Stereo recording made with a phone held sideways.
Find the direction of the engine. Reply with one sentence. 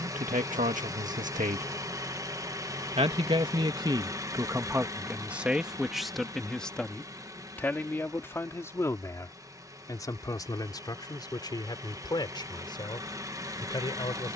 You can hear the engine on the right.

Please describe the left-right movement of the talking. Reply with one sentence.
You can hear the talking go from the right side to the left.